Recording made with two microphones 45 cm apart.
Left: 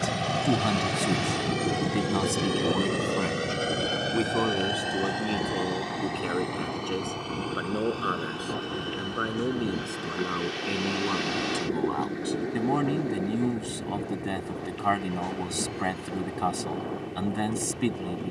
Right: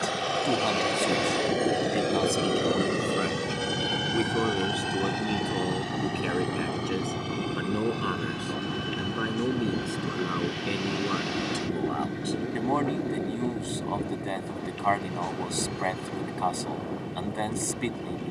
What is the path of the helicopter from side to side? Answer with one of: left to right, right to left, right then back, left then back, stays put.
left to right.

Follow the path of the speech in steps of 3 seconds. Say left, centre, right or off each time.
left, centre, centre, centre, left, left.